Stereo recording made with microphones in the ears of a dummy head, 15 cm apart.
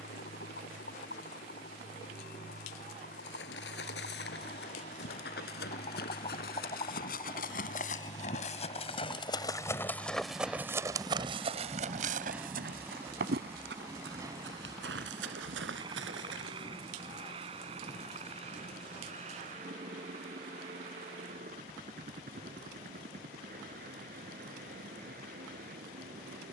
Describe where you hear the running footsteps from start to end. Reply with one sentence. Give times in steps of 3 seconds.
In this clip you hear the running footsteps not at all from 0 s, on the left from 3 s, in the centre from 9 s, on the right from 12 s and not at all from 18 s.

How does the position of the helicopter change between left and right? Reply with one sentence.
You can hear the helicopter travel towards the right.